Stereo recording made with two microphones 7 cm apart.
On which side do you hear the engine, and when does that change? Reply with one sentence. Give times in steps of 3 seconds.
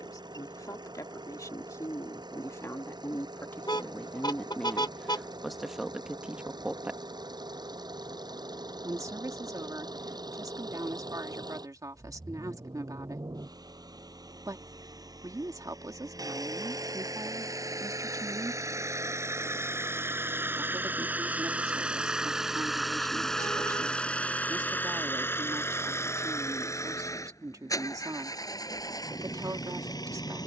You can hear the engine on the right from 0 s, in the centre from 21 s and on the left from 24 s.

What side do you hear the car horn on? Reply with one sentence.
You can hear the car horn on the left.